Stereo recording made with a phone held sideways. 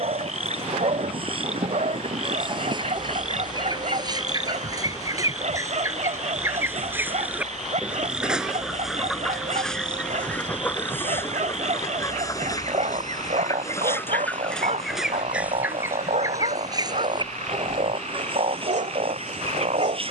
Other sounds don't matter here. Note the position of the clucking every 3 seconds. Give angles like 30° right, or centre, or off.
40° right, 30° right, 10° right, 10° left, 20° left, 20° right, 40° right.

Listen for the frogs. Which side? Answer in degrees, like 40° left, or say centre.
60° right.